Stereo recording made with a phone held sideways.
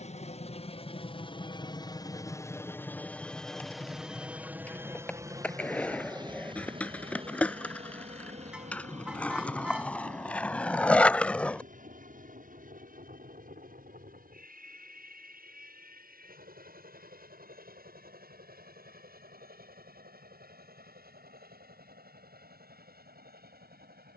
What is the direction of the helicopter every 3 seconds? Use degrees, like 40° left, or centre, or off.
30° left, 10° right, 40° right, 50° right, 60° right, 60° right, 60° right, 60° right.